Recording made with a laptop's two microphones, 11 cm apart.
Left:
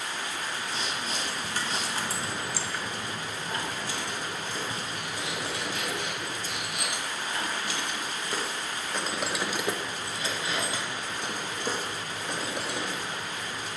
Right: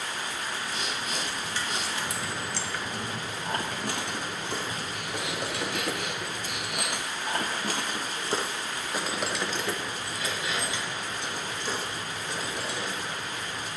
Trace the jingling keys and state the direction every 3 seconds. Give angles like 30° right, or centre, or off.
40° left, 60° right, 40° right, 30° left, 60° left.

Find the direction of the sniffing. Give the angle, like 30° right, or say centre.
30° left.